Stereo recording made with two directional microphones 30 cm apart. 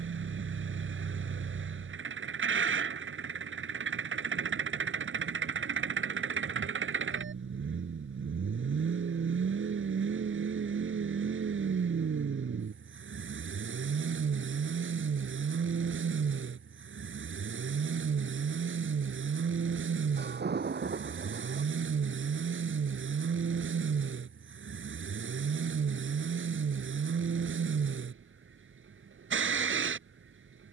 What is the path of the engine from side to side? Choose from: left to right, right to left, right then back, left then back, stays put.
stays put.